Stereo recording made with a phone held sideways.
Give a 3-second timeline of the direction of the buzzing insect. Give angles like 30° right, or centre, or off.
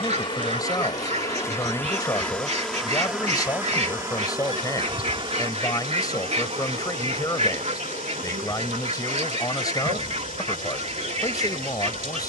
20° left, 30° right, 60° right, 70° right.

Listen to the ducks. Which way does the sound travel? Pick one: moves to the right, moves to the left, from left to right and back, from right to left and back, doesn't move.
doesn't move.